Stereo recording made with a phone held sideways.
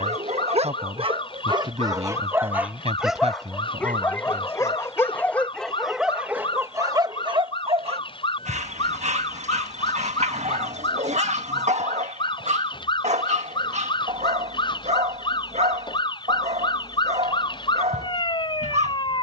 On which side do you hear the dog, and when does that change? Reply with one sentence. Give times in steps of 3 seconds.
You can hear the dog on the right from 0 s, in the centre from 3 s and on the right from 6 s.